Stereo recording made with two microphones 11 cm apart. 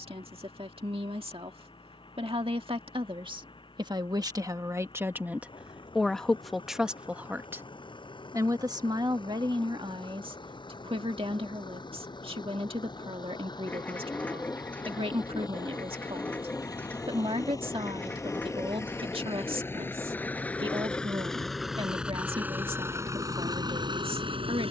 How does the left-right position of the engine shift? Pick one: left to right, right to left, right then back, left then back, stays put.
left to right.